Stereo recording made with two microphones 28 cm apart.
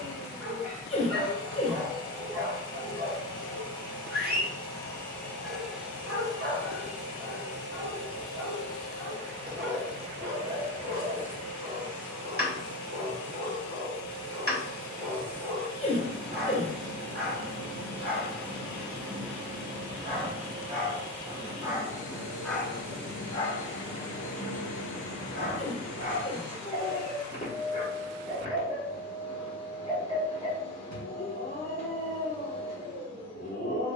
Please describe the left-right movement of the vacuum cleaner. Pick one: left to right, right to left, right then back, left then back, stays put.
left to right.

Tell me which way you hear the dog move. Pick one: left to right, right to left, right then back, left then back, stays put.
right to left.